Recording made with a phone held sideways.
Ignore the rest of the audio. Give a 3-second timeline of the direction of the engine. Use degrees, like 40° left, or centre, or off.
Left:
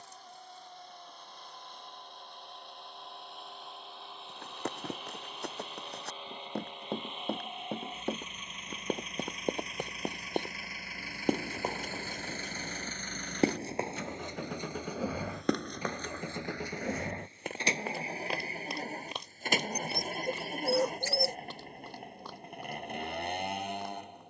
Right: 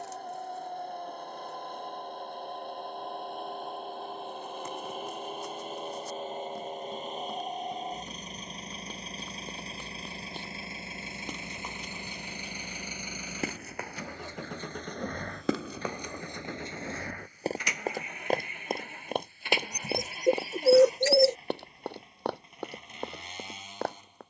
50° right, 50° right, 40° right, 30° right, 10° right, 20° left, 40° left, 60° left.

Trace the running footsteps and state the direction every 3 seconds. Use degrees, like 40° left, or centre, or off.
off, 70° left, 70° left, 60° left, 30° left, 20° right, 60° right, 70° right.